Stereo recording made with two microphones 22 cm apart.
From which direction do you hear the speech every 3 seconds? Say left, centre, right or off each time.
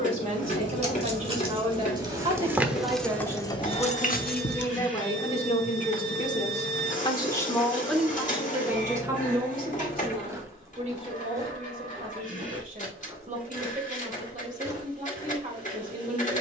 right, centre, centre, right, right, right.